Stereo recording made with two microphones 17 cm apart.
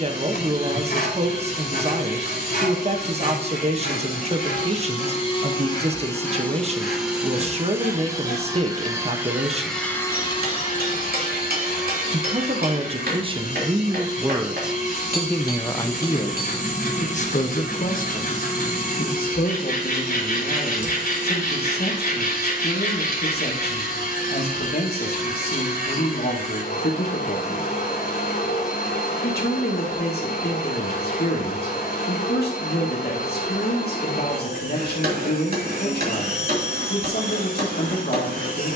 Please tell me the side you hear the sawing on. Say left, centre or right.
left.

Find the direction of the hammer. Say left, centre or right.
right.